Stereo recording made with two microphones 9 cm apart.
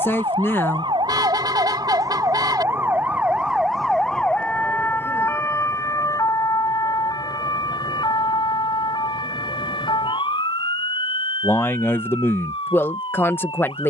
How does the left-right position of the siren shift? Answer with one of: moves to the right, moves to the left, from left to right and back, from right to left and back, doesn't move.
moves to the left.